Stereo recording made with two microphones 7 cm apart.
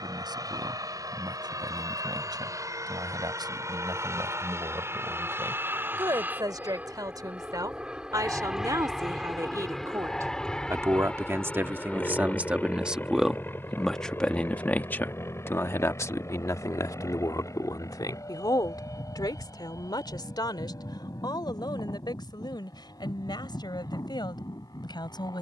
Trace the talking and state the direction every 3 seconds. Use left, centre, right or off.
right, right, right, right, centre, left, left, left, left.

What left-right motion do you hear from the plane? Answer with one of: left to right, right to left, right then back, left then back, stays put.
right to left.